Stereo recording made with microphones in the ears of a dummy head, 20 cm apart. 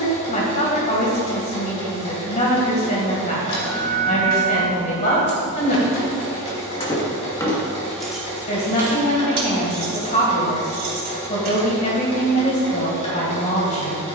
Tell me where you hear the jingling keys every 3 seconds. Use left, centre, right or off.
off, left, centre, right, off.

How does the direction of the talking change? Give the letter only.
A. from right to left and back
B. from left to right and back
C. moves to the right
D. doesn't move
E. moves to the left
D.